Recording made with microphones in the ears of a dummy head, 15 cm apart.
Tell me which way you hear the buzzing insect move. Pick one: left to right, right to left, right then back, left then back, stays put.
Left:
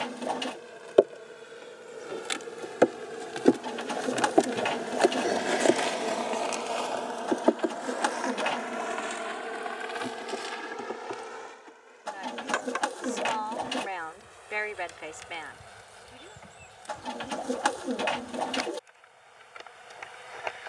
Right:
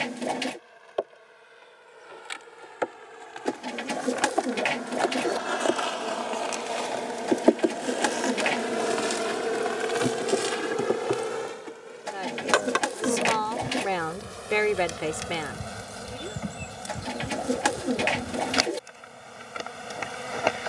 left to right.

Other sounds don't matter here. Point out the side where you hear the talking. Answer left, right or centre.
right.